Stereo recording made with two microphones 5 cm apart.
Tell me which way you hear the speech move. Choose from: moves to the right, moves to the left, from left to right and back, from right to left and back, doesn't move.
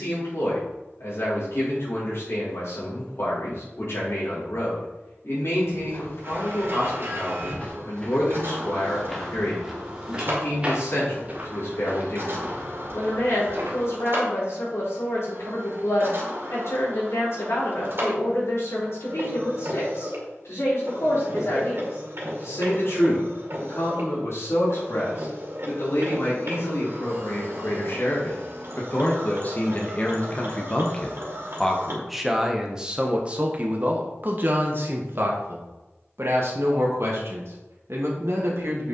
moves to the right.